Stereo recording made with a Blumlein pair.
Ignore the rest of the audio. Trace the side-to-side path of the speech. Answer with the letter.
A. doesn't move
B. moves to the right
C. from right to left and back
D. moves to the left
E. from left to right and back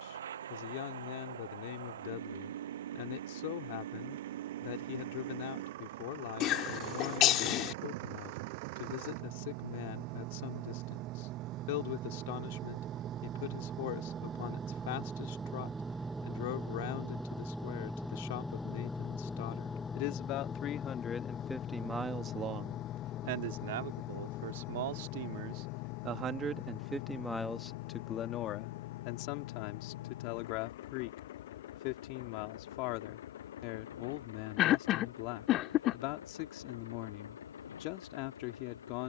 E.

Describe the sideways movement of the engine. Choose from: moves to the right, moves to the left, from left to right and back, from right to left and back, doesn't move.
moves to the left.